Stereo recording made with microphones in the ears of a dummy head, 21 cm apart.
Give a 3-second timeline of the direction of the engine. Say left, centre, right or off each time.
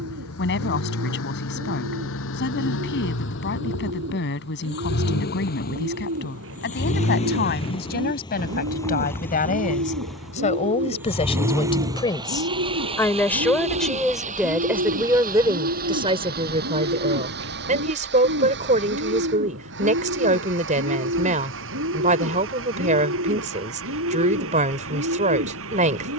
left, left, left, centre, right, right, right, right, right.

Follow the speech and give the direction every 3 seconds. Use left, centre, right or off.
left, left, left, left, centre, right, right, right, right.